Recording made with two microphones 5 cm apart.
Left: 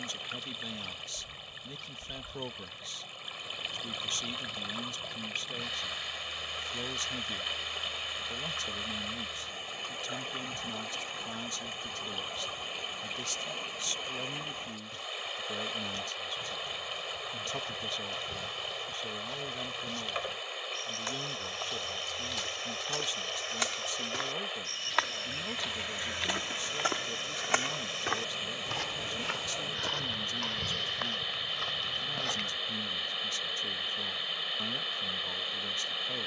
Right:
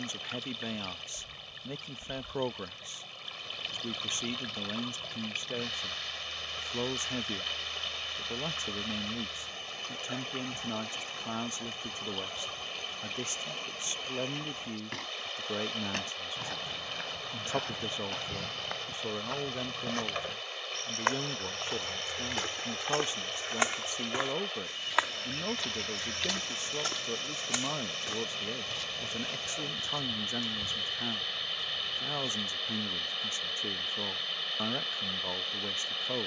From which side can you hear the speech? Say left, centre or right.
right.